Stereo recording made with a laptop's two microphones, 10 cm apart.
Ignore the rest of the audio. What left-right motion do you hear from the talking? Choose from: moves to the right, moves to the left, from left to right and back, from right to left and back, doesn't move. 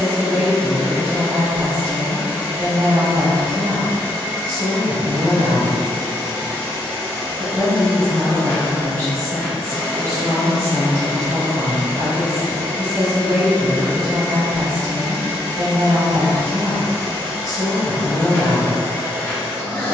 doesn't move.